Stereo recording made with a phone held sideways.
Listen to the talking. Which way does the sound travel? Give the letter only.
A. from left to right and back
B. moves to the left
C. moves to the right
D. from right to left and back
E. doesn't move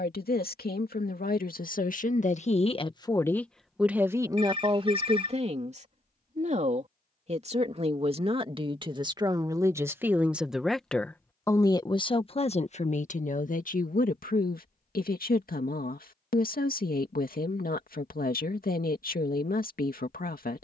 A.